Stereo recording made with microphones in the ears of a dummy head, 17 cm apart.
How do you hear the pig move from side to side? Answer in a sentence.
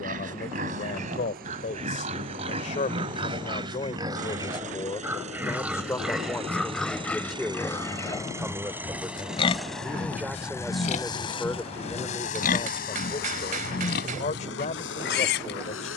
In this clip you hear the pig go from the right side to the left.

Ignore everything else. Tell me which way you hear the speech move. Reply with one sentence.
You can hear the speech go right and come back.